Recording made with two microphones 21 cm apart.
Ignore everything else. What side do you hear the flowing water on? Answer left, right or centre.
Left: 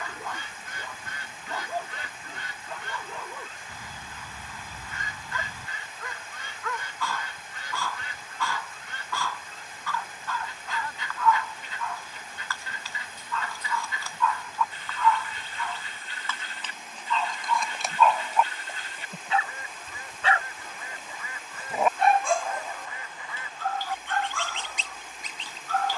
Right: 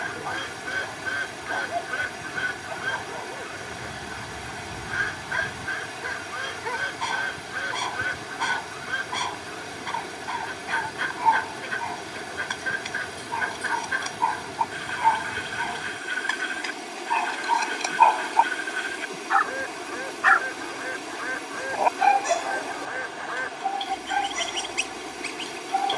right.